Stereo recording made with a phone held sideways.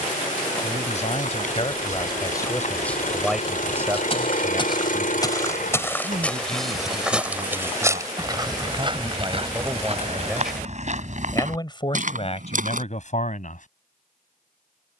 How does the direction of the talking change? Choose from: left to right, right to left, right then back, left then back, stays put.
right then back.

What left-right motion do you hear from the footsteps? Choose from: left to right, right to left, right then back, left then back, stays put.
left to right.